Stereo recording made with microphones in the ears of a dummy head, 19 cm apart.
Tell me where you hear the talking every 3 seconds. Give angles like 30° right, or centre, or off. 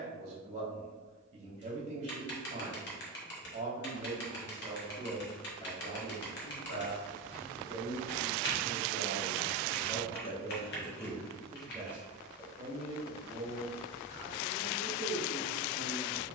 30° right, 20° right, 50° left, 20° left, 30° right, 30° right.